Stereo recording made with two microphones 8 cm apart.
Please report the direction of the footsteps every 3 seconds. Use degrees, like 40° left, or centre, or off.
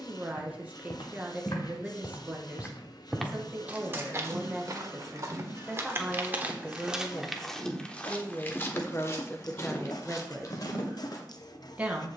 50° left, 30° right, centre, 50° left.